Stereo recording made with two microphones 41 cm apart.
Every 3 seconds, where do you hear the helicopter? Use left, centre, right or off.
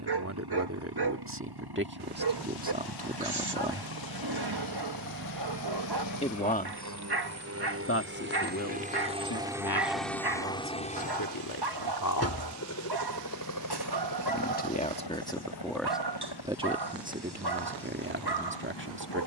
right, right, right, centre, left, left, left.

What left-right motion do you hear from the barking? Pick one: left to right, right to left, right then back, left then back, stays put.
stays put.